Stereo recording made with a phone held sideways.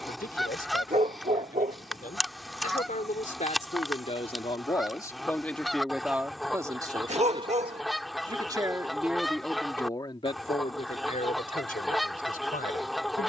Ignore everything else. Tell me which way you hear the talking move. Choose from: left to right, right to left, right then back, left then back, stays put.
right then back.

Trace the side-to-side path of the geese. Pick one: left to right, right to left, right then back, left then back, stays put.
stays put.